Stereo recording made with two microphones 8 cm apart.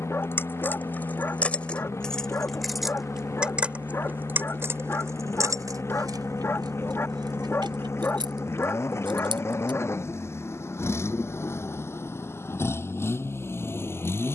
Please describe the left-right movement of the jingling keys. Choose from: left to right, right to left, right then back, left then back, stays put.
left to right.